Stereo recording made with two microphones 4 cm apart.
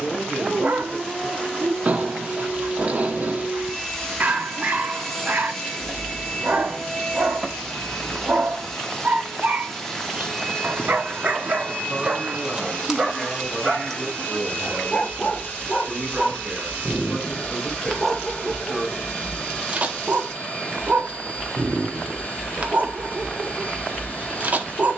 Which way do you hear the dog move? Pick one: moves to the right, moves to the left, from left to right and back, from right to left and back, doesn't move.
from right to left and back.